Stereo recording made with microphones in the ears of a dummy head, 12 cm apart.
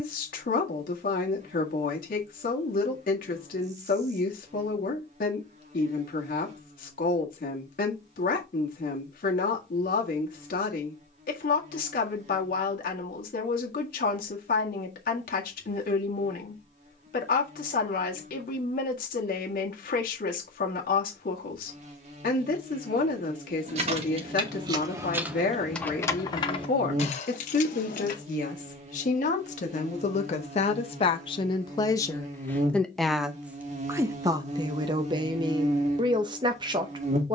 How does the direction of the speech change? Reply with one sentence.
In this clip you hear the speech move to the right.